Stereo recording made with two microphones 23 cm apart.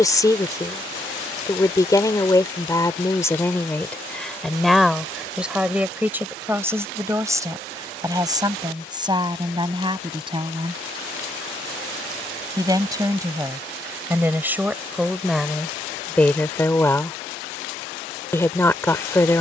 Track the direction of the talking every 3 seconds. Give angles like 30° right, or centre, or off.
20° left, centre, 10° right, 20° right, 10° right, centre, 10° left.